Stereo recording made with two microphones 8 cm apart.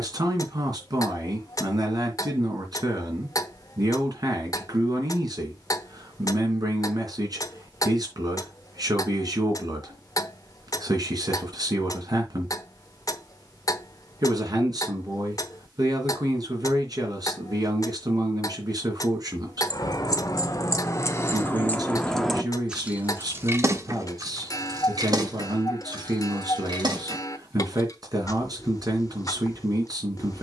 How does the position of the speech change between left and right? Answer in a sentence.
You can hear the speech stay put.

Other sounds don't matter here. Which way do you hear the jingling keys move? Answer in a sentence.
You can hear the jingling keys move from left to right.